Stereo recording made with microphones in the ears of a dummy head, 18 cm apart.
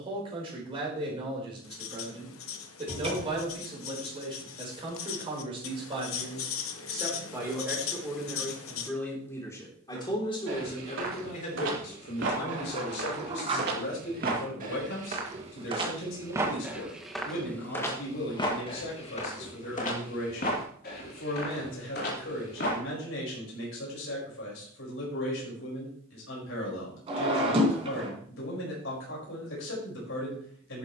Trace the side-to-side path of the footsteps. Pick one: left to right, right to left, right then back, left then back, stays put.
right to left.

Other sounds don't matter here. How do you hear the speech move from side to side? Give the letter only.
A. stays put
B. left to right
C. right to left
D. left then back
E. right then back
C.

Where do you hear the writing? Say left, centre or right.
left.